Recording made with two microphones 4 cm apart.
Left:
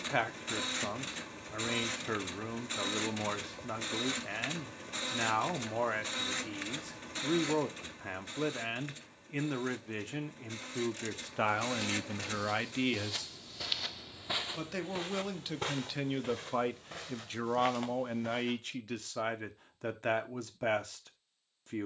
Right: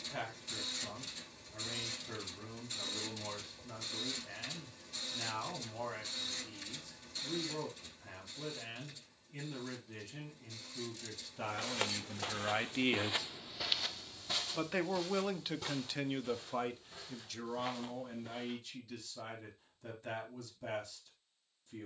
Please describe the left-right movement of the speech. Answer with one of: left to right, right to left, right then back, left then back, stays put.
right then back.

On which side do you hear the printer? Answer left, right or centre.
left.